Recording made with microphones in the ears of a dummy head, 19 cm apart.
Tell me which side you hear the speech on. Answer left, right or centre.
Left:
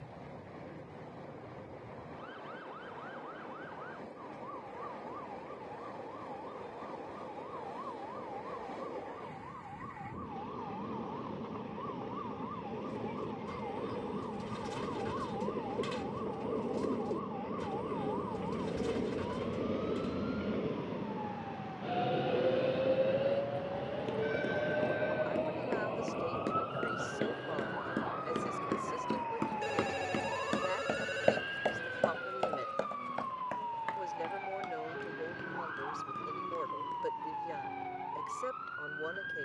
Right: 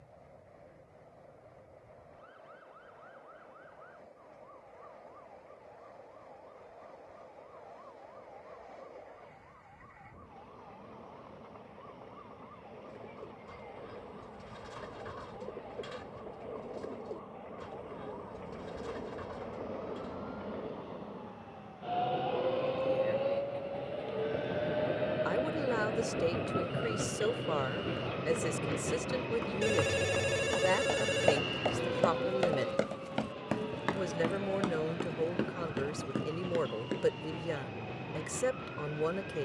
right.